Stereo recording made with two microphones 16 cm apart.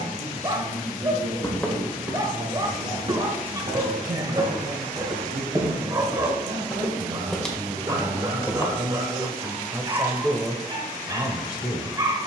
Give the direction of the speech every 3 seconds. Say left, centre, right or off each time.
right, right, right, centre.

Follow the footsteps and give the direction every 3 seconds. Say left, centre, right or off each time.
centre, right, centre, off.